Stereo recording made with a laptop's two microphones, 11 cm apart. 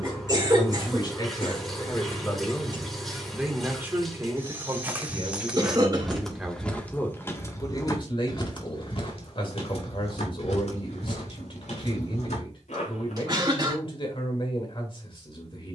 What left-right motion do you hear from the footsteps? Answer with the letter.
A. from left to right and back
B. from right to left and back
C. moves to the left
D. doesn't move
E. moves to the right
C.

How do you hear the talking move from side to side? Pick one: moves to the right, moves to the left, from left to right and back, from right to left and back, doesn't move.
from left to right and back.